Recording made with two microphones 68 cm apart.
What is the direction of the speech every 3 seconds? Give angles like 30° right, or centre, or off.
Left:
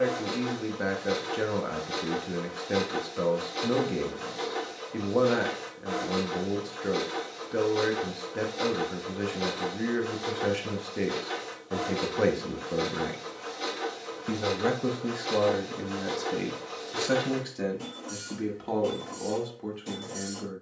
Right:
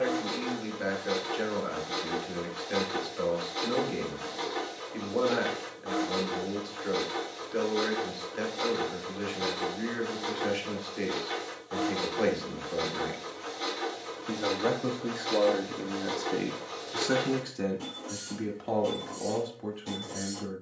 80° left, 80° left, 80° left, 80° left, 70° left, 20° left, centre.